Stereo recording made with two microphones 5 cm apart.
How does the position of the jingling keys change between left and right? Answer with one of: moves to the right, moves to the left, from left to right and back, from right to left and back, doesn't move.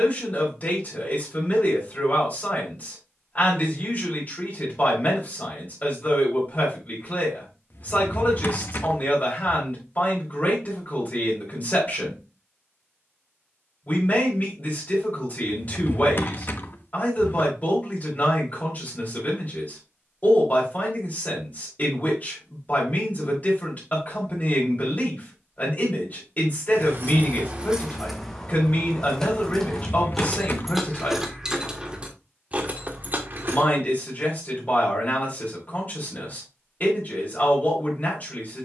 from right to left and back.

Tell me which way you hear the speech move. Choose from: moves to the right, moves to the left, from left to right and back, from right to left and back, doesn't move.
doesn't move.